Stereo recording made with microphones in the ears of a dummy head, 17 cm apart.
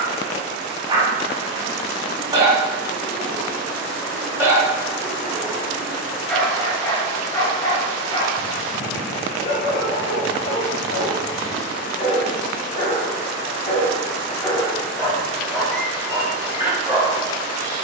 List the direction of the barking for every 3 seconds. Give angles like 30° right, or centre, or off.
20° right, 10° right, 20° left, 50° left, 30° left, 10° right.